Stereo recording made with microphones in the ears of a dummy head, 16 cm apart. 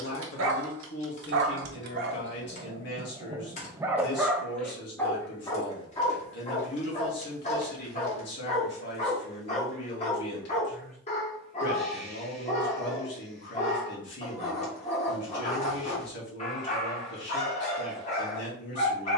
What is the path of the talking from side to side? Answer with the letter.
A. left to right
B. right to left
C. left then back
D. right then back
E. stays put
E.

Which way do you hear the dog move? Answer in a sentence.
In this clip you hear the dog move to the left.